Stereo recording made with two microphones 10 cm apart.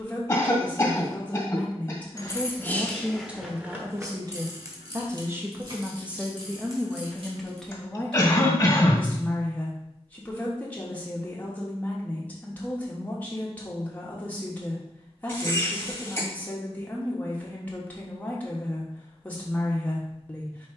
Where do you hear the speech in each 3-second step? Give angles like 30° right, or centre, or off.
10° left, 20° right, centre, 20° left, 20° left, 20° left, 20° left.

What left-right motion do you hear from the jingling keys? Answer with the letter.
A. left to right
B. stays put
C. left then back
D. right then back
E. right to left
A.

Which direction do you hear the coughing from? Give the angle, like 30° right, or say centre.
20° left.